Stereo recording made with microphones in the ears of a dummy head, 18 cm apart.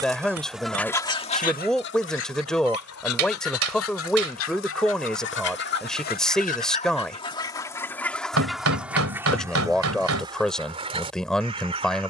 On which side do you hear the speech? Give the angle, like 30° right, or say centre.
centre.